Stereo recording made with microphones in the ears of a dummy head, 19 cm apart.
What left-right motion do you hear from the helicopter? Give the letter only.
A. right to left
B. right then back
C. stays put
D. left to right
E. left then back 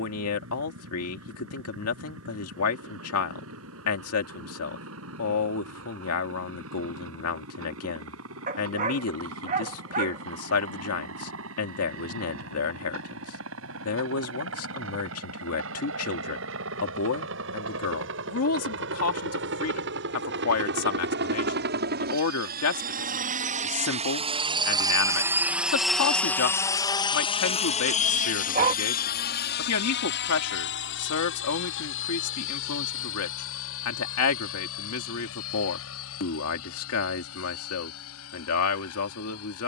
A.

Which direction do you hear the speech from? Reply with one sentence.
You can hear the speech on the left.